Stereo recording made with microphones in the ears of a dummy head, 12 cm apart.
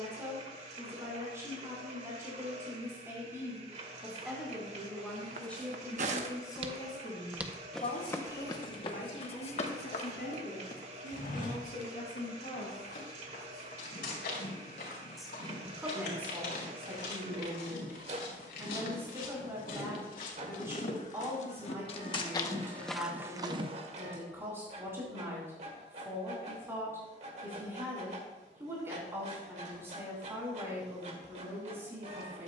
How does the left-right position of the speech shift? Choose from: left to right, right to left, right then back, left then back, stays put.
left then back.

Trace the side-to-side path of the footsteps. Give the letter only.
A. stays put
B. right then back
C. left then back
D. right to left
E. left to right
C.